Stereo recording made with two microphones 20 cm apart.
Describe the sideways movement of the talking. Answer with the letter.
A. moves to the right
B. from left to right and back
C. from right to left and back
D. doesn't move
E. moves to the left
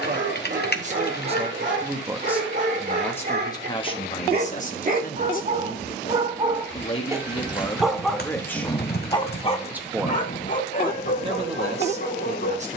C.